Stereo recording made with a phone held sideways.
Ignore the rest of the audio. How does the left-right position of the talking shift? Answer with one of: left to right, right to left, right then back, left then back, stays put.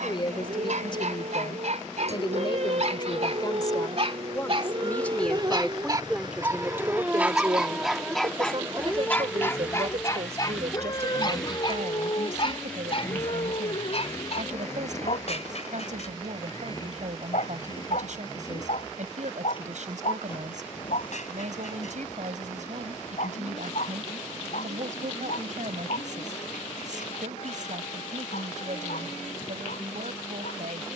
left to right.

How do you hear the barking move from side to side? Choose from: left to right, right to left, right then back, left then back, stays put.
right to left.